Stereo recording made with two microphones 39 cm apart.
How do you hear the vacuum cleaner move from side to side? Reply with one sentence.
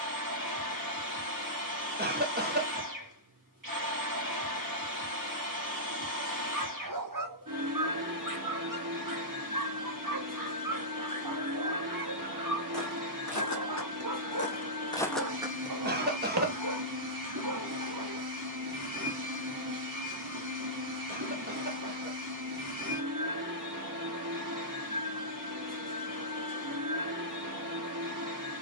In this clip you hear the vacuum cleaner stay put.